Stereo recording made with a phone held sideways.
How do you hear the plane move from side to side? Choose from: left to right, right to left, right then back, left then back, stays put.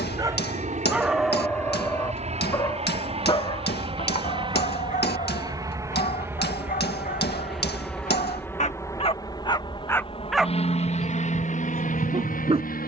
right to left.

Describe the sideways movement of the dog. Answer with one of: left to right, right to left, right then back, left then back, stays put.
left then back.